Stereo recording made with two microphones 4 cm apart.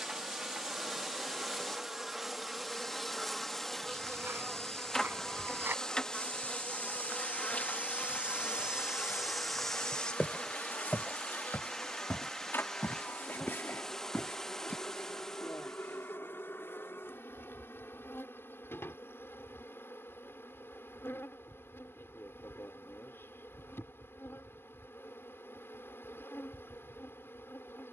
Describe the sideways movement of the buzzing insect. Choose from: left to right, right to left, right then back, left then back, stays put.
right to left.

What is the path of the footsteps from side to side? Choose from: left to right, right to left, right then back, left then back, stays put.
right to left.